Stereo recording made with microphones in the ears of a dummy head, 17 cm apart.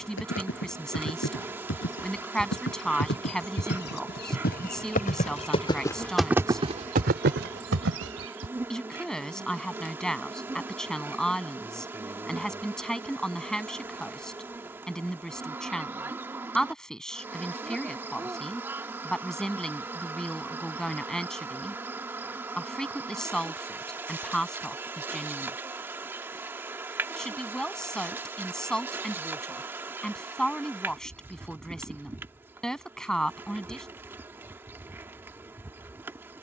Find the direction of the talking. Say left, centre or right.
centre.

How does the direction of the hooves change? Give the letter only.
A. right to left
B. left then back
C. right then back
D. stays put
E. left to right
E.